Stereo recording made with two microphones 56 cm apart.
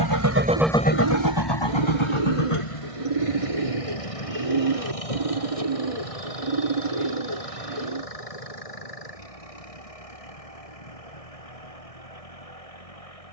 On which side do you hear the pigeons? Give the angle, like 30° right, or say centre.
70° right.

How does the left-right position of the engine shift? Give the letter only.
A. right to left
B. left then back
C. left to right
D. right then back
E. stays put
A.